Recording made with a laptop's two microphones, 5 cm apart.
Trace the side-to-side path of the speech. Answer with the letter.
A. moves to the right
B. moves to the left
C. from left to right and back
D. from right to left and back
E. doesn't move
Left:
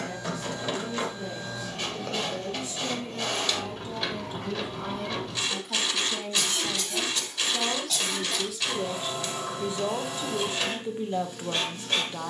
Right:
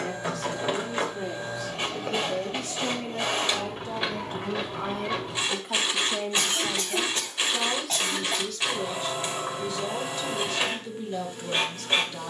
B.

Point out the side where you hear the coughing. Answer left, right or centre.
right.